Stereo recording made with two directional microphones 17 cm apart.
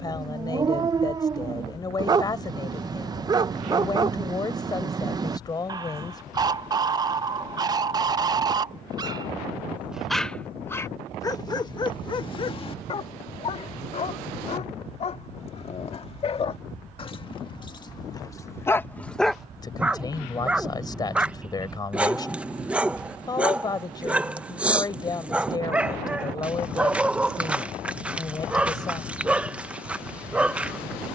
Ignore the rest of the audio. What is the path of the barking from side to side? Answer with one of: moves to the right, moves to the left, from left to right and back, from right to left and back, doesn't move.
from right to left and back.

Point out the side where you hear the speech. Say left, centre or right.
left.